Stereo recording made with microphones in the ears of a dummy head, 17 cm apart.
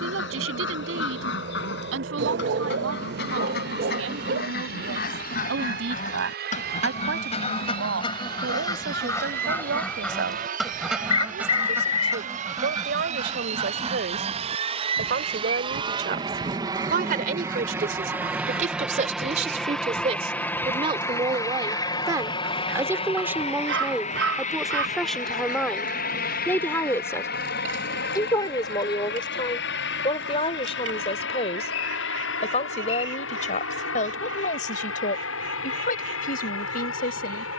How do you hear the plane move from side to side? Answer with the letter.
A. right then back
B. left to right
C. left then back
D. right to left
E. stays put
D.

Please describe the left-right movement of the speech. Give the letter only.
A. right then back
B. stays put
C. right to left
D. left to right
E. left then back
C.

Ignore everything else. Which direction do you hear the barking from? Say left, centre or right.
right.